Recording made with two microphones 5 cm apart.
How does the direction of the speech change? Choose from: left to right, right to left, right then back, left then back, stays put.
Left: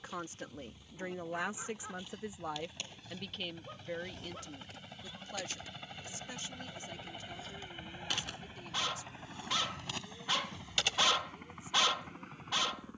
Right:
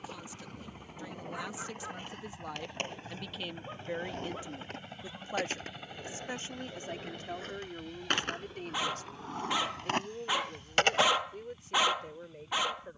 left to right.